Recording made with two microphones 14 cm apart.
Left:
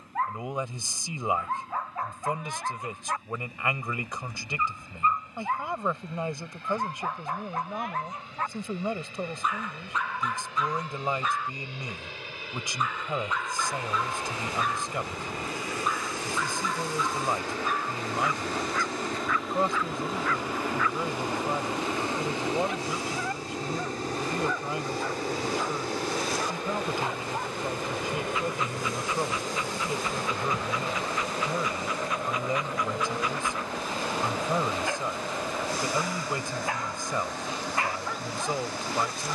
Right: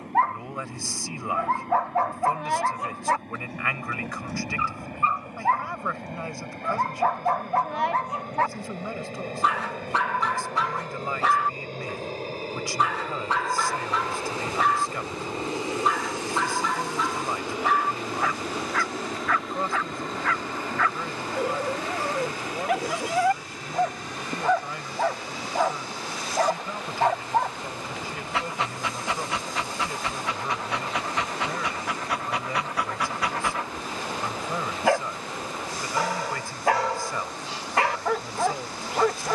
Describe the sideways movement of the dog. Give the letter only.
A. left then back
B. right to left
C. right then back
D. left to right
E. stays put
E.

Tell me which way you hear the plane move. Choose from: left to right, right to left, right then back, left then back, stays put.
right to left.